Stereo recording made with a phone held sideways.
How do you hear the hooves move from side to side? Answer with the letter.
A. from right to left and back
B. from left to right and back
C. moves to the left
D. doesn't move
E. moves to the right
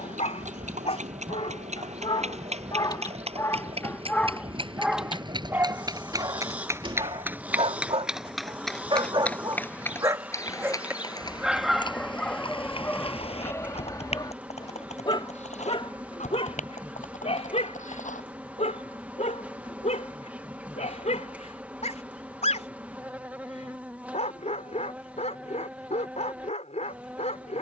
C.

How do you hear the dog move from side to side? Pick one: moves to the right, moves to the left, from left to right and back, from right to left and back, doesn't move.
from left to right and back.